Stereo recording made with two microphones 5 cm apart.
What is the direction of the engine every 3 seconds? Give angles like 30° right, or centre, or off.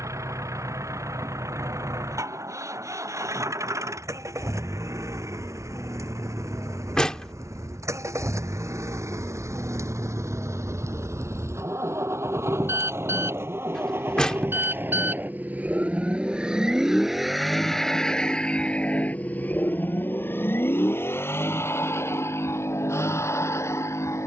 80° right, 80° right, 70° right, 70° right, 50° right, 10° right, 30° left, 60° left.